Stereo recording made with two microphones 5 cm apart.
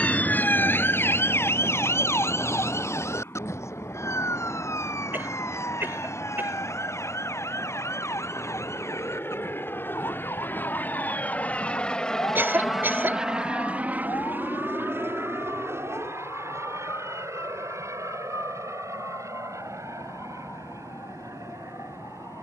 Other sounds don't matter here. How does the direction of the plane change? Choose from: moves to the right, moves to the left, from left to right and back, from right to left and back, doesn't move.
moves to the right.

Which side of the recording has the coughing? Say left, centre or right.
right.